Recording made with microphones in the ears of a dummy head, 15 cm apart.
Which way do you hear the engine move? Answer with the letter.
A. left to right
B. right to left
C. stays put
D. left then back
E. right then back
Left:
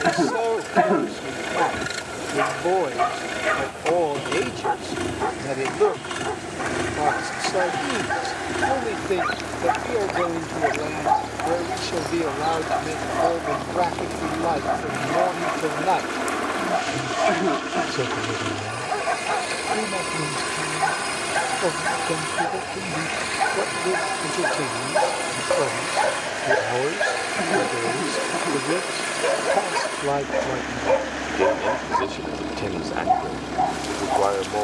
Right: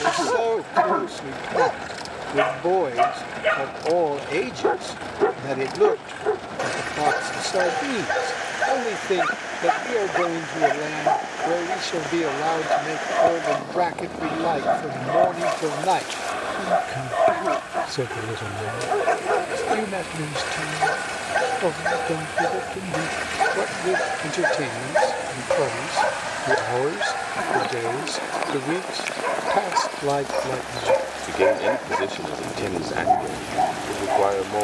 C.